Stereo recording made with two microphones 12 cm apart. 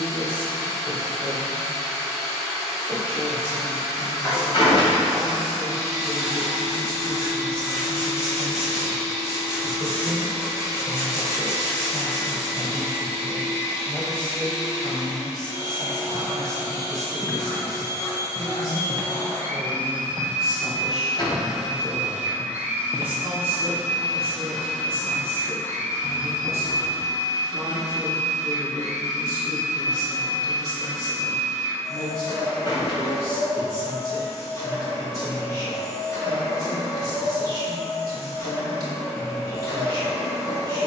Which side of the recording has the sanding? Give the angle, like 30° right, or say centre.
30° left.